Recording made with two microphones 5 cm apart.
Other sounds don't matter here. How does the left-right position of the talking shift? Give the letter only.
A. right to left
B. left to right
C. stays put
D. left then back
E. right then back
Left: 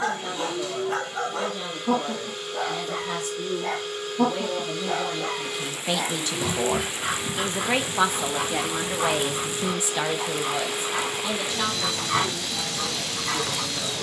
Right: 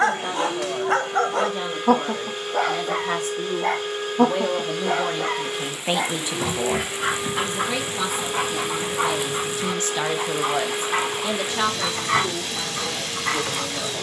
D.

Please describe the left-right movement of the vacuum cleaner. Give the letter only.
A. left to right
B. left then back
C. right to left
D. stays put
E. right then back
D.